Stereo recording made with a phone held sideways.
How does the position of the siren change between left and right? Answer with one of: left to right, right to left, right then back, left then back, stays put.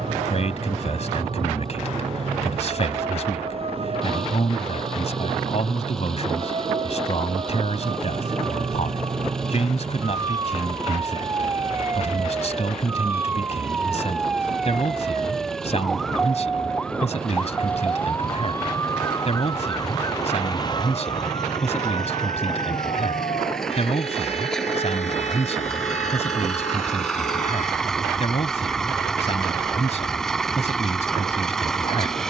right to left.